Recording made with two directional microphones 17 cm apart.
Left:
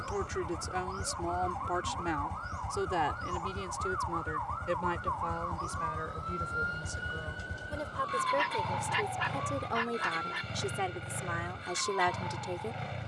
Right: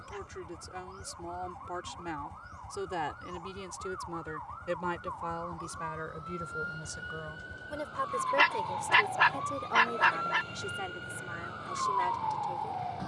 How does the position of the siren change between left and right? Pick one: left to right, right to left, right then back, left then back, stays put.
left to right.